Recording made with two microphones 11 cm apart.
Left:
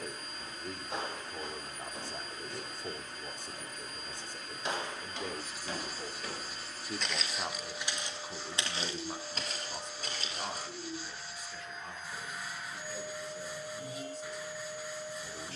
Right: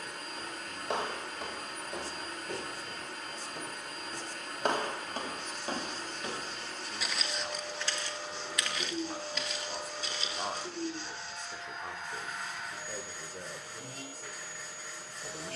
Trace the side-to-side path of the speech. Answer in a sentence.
In this clip you hear the speech move from left to right.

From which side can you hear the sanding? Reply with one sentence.
You can hear the sanding in the centre.